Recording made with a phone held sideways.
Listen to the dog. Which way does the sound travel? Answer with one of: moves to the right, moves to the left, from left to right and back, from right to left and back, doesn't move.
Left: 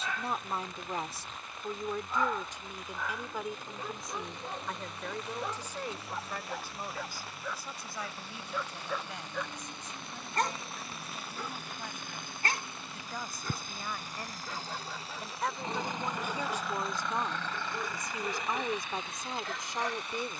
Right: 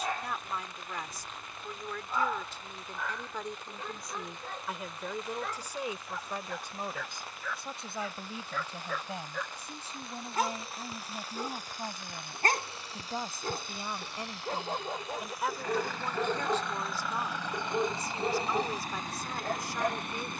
from right to left and back.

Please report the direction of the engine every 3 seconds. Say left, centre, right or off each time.
left, left, left, left, left, centre, right.